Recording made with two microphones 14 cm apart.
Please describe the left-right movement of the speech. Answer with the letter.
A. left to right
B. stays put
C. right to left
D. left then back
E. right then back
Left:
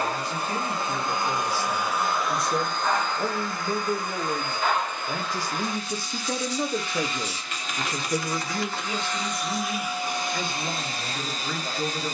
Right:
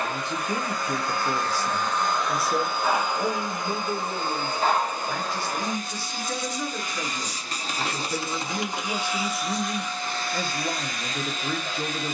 D.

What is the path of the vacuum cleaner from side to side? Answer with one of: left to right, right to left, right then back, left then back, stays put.
right then back.